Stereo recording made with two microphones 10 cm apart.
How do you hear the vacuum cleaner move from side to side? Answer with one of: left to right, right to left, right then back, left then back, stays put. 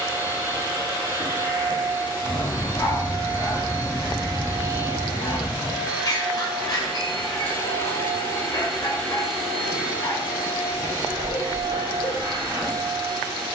left then back.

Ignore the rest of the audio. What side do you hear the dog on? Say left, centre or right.
left.